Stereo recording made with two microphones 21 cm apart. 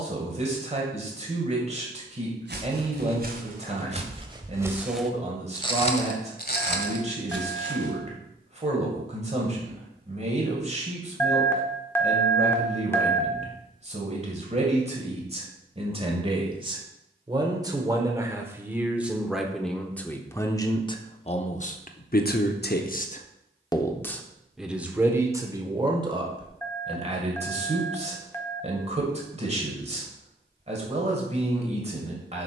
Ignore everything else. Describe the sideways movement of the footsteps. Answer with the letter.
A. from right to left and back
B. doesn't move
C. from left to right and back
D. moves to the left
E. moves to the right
D.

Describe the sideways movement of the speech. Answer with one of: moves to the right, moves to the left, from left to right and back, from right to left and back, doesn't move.
from right to left and back.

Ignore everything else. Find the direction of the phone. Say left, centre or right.
centre.